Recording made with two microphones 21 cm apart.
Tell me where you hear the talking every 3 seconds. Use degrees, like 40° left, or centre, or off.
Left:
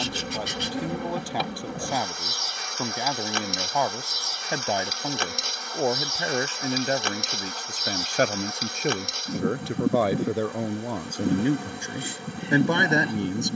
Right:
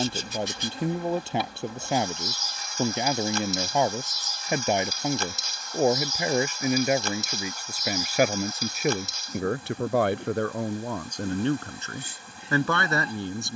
20° right, 20° right, 10° right, 10° left, 20° left.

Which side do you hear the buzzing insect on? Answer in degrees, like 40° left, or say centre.
70° left.